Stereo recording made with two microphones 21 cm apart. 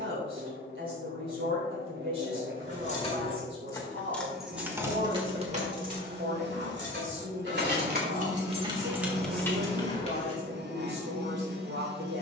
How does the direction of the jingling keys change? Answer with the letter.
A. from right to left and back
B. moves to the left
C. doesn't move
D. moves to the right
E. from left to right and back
E.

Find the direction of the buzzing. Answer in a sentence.
You can hear the buzzing on the right.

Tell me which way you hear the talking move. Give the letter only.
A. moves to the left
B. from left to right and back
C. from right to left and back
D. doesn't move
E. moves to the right
D.